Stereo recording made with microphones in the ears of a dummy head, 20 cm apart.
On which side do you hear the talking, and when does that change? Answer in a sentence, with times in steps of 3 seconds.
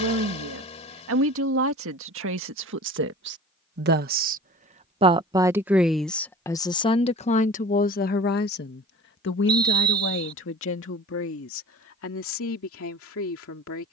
You can hear the talking on the right from 0 s and on the left from 6 s.